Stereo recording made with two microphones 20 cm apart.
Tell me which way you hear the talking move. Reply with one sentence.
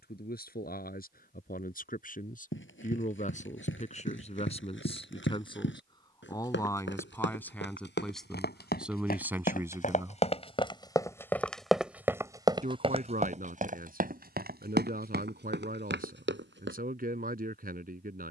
In this clip you hear the talking move from left to right.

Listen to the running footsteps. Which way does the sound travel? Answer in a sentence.
In this clip you hear the running footsteps travel towards the right.